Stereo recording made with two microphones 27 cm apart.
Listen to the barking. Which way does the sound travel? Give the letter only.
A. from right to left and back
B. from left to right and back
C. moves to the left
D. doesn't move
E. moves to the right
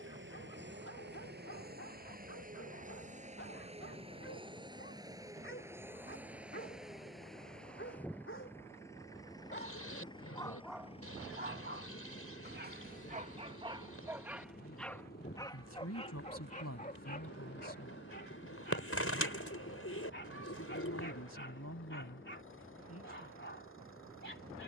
B.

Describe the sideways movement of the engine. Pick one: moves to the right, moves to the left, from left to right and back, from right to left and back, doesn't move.
moves to the left.